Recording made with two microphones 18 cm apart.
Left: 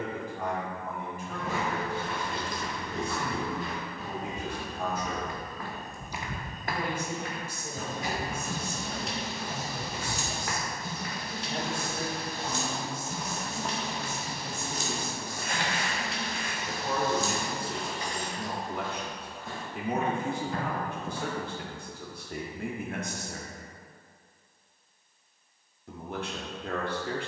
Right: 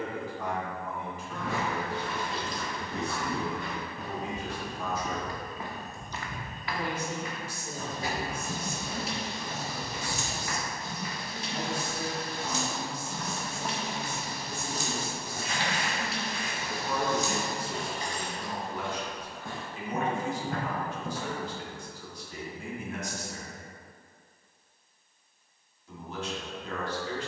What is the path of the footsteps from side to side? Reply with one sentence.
In this clip you hear the footsteps go left and come back.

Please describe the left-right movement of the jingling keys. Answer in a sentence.
You can hear the jingling keys move from right to left and back again.